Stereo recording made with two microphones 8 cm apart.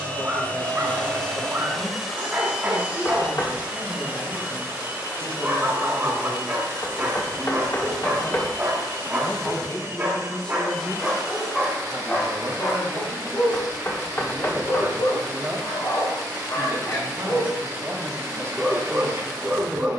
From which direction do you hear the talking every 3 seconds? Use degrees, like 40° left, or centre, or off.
70° left, 70° left, 60° left, 20° left, 30° right, 40° right, 40° right.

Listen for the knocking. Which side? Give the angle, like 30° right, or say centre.
30° left.